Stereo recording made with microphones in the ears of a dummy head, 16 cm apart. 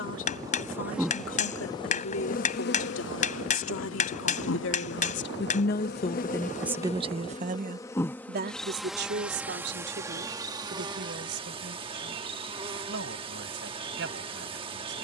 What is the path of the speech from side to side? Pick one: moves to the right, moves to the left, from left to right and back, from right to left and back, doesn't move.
moves to the right.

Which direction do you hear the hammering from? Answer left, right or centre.
left.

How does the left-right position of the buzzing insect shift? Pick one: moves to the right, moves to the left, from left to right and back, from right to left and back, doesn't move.
from right to left and back.